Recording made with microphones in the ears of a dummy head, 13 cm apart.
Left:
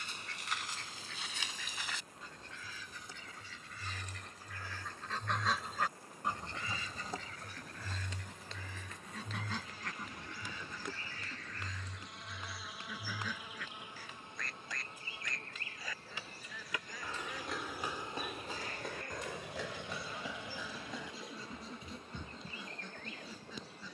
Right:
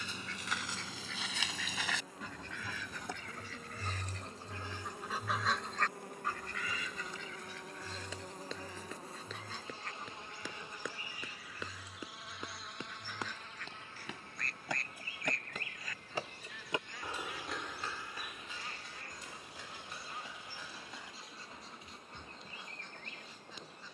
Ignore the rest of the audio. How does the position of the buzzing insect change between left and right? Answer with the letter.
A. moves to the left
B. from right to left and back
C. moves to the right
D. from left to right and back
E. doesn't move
A.